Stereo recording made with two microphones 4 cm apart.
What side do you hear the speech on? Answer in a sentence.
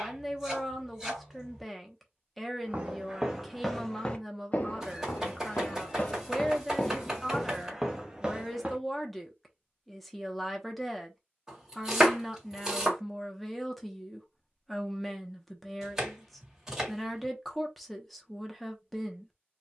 You can hear the speech in the centre.